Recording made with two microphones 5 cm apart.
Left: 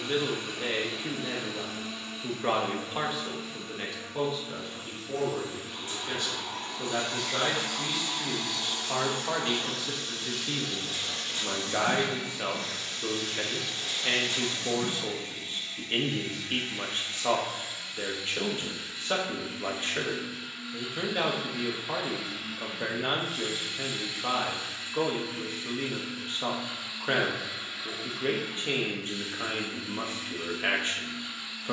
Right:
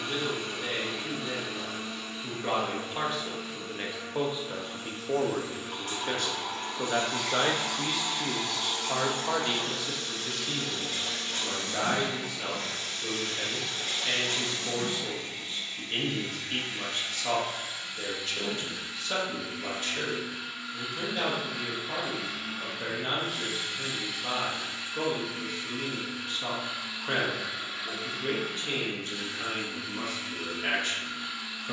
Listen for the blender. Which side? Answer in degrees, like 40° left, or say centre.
70° right.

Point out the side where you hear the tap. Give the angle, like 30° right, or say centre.
70° right.